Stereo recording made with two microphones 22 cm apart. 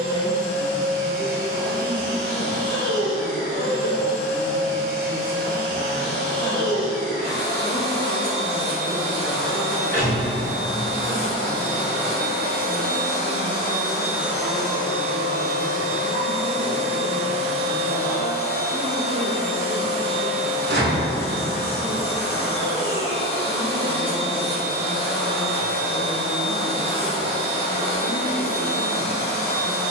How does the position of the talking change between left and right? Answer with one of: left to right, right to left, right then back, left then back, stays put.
left to right.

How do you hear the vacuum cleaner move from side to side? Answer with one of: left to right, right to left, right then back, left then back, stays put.
right to left.